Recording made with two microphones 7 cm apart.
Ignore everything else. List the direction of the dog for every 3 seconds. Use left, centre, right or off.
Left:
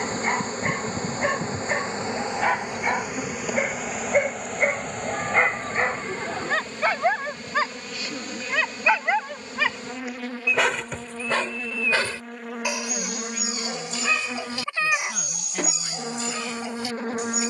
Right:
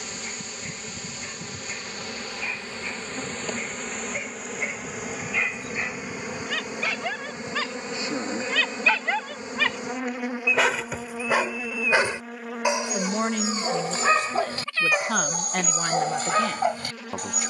left, left, left, centre, right, right.